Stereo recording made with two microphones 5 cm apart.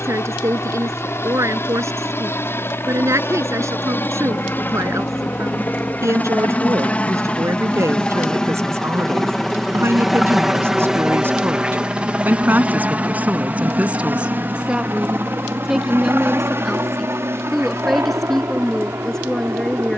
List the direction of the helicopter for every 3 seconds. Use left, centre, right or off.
left, left, left, centre, right, right, right.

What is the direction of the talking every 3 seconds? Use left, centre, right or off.
right, right, right, right, right, centre, centre.